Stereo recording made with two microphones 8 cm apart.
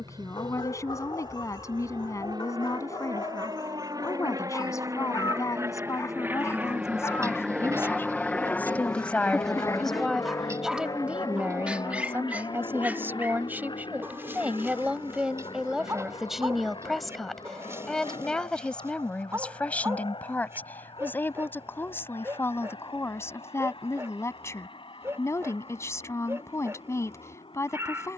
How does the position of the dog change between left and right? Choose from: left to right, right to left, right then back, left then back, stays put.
left to right.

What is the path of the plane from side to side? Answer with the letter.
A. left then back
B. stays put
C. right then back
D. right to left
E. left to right
D.